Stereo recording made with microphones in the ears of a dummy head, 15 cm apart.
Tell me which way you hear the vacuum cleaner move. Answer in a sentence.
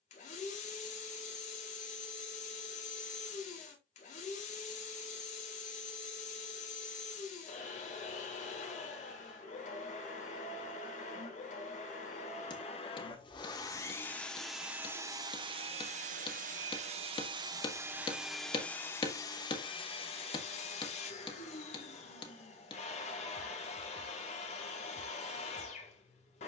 In this clip you hear the vacuum cleaner go right and come back.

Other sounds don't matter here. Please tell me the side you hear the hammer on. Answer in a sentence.
In this clip you hear the hammer on the left.